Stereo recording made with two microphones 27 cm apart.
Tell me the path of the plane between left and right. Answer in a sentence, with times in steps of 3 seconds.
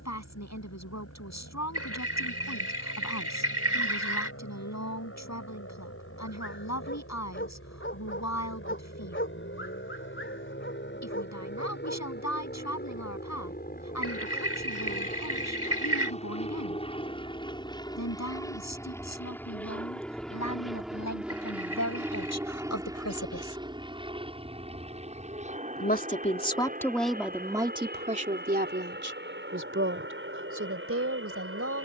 You can hear the plane on the left from 0 s, in the centre from 18 s and on the right from 24 s.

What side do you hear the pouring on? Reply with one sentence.
In this clip you hear the pouring on the right.